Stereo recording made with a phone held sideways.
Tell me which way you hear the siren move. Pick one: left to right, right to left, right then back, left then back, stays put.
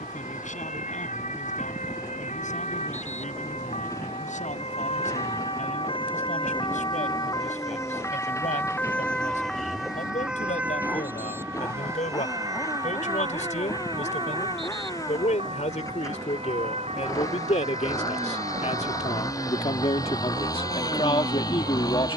left to right.